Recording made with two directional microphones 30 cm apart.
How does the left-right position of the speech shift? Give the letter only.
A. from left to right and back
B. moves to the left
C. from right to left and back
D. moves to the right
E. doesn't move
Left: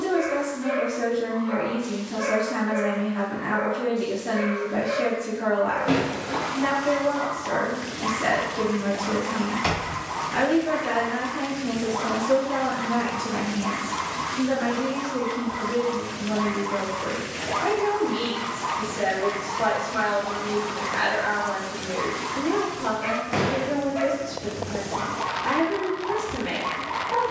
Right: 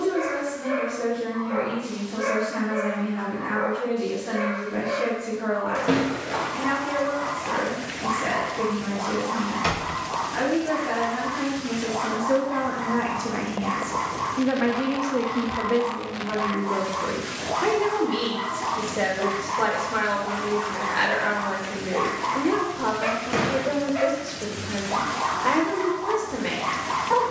D.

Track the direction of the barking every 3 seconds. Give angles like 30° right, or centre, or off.
20° left, 20° left, 20° left, 20° left, 20° left, 20° left, centre, 40° right, 50° right.